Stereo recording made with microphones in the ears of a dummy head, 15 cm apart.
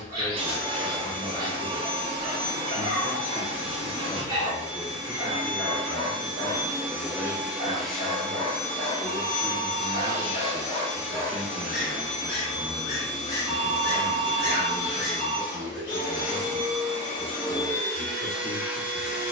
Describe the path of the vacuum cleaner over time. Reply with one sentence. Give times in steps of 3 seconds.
In this clip you hear the vacuum cleaner on the right from 0 s, in the centre from 6 s, on the left from 9 s and in the centre from 18 s.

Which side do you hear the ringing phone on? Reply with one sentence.
You can hear the ringing phone on the right.